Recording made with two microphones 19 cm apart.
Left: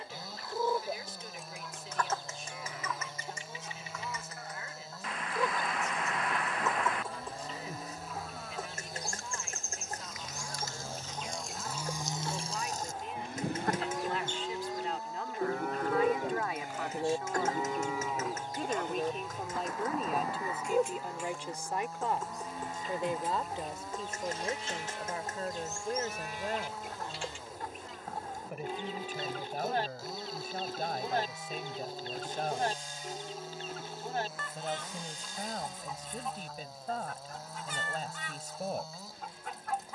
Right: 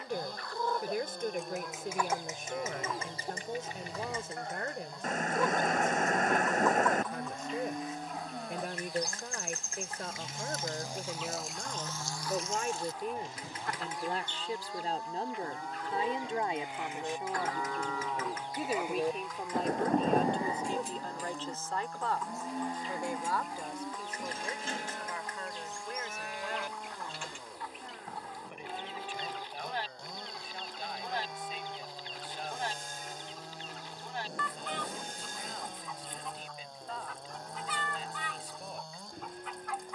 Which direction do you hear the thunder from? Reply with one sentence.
You can hear the thunder on the right.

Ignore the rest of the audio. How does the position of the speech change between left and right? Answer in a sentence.
In this clip you hear the speech go from the right side to the left.